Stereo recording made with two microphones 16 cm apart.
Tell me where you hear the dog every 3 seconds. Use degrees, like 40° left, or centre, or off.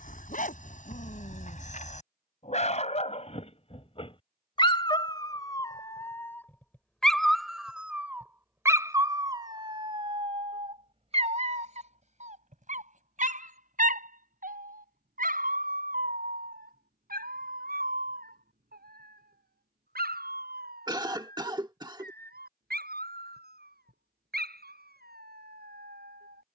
50° left, 30° left, centre, 30° right, 60° right, 70° right, 70° right, 80° right, 80° right.